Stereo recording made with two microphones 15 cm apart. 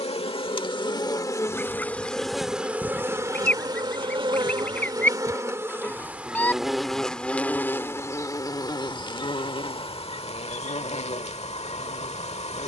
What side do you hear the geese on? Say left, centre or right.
centre.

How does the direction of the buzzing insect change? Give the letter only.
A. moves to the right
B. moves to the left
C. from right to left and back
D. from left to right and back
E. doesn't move
D.